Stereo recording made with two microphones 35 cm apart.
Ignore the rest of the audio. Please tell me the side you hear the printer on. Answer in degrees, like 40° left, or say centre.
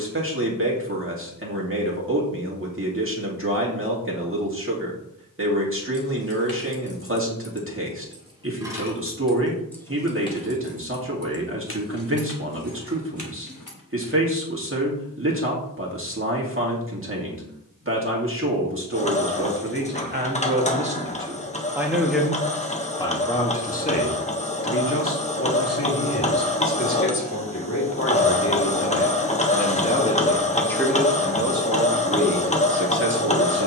20° left.